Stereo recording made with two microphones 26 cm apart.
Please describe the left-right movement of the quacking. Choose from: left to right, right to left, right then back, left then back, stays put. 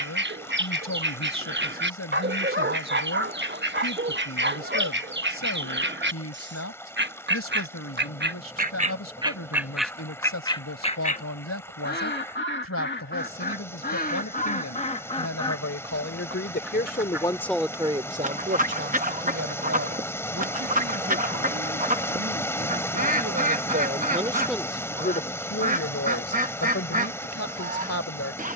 left then back.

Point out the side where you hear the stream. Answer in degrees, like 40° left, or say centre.
10° left.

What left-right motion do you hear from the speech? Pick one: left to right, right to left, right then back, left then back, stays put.
right then back.